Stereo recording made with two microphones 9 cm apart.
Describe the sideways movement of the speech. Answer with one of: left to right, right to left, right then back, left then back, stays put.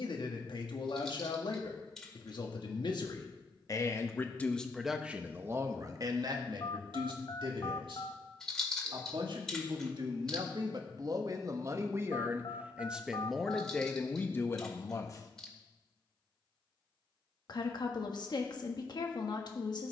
right then back.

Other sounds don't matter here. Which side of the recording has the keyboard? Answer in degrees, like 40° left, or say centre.
10° left.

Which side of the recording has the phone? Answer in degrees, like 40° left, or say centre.
50° left.